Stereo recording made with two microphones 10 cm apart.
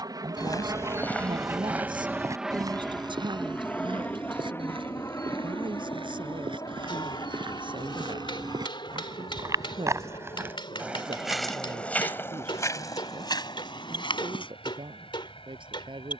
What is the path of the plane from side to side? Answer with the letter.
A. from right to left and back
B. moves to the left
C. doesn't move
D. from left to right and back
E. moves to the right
B.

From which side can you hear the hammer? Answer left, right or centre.
left.